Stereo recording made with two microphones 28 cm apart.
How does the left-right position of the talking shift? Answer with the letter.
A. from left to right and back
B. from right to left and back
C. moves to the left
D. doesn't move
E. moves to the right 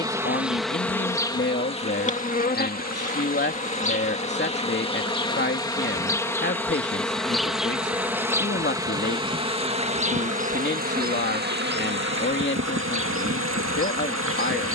D.